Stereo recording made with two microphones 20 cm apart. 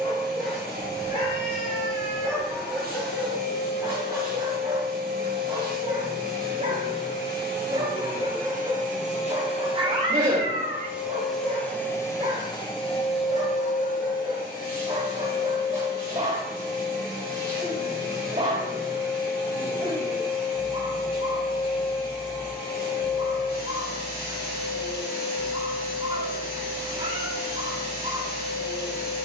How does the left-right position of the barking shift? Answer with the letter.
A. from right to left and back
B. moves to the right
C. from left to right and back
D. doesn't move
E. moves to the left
B.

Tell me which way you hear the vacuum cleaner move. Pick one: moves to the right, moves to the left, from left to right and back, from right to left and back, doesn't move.
moves to the left.